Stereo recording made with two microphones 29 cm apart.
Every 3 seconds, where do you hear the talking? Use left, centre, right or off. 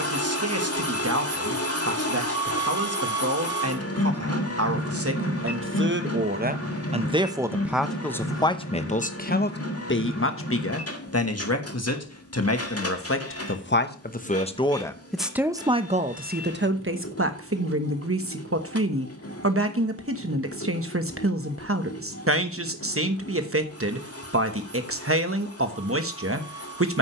right, right, centre, left, left, right, right, right, right.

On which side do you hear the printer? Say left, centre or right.
left.